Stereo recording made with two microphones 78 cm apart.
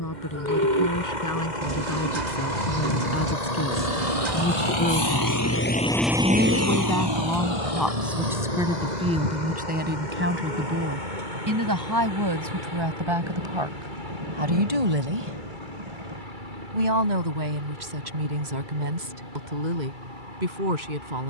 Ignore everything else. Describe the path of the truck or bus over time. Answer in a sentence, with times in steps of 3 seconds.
You can hear the truck or bus on the left from 0 s and on the right from 6 s.